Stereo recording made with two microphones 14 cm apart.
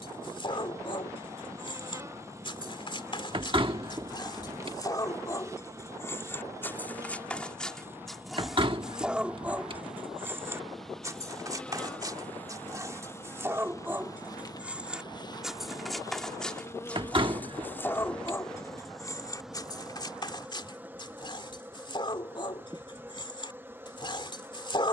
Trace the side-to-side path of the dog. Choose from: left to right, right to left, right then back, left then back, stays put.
right then back.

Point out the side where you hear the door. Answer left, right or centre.
right.